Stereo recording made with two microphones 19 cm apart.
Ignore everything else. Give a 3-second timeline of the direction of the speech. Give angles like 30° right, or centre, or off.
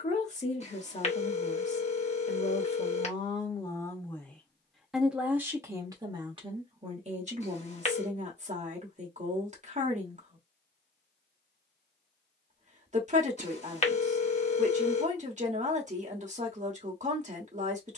40° left, centre, 40° right, 40° right, 40° right, 40° right.